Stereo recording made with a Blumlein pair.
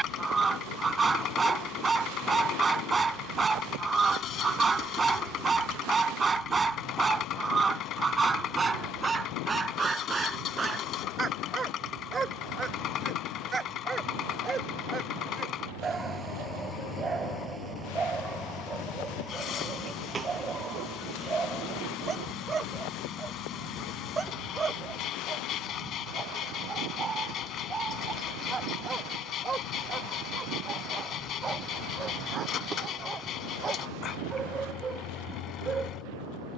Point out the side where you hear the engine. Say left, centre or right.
left.